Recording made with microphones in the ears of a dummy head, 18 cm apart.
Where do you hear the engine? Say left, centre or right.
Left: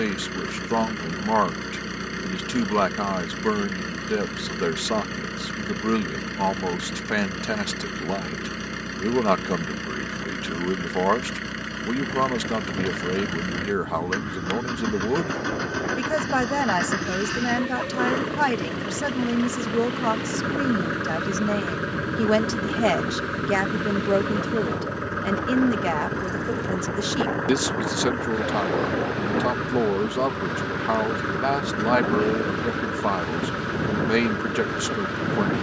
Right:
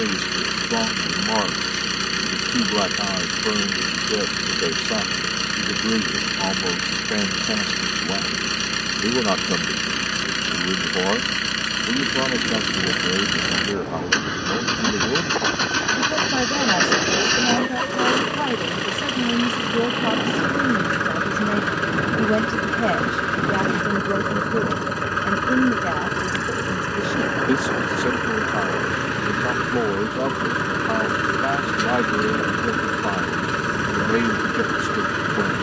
right.